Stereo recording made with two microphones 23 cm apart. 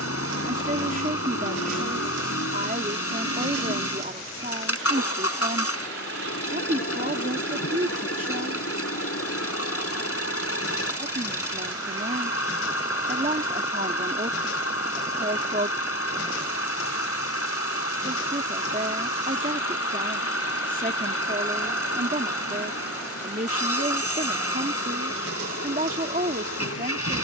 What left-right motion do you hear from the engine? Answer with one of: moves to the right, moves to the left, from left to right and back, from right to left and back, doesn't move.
doesn't move.